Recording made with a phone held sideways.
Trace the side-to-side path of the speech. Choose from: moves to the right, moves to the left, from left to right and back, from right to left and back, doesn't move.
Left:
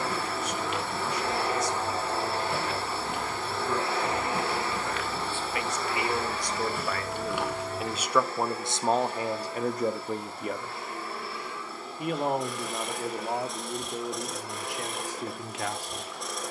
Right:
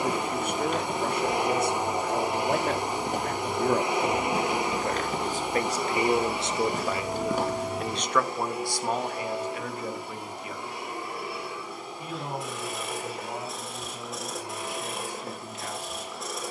moves to the left.